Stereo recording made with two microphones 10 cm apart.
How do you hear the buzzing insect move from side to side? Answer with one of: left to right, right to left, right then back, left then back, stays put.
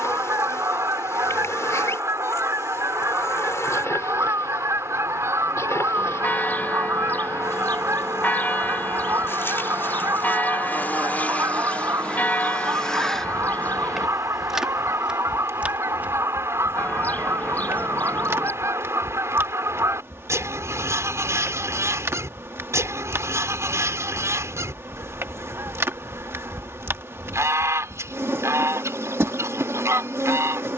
left to right.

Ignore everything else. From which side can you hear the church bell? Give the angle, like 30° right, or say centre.
20° left.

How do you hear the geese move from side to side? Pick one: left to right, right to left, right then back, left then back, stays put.
stays put.